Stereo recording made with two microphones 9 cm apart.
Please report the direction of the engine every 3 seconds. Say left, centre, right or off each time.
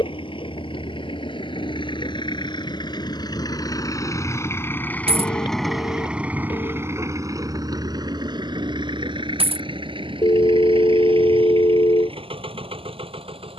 left, left, right, right, right.